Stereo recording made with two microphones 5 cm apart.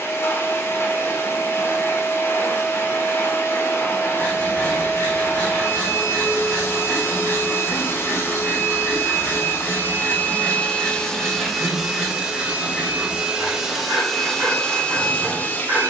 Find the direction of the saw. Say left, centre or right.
right.